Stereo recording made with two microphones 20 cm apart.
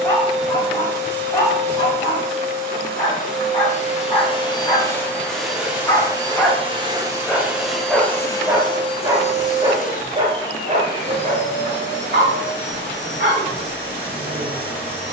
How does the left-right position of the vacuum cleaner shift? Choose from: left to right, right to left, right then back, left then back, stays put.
right then back.